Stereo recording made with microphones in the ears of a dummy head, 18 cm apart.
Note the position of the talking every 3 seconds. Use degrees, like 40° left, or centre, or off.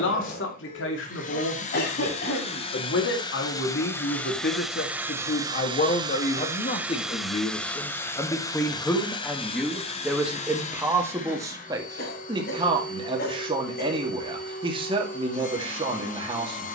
70° left, 50° left, 30° left, 10° right, 30° right, 30° right.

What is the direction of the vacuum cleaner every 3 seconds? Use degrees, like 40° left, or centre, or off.
40° left, centre, centre, 30° left, 40° left, 40° left.